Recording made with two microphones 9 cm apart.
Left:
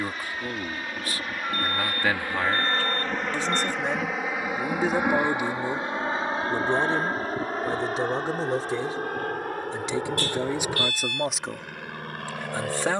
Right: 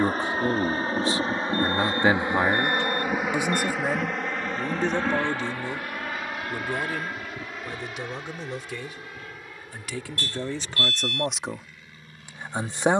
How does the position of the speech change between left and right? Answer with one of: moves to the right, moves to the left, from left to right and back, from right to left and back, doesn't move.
from right to left and back.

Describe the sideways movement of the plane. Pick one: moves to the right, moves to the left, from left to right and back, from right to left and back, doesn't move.
moves to the left.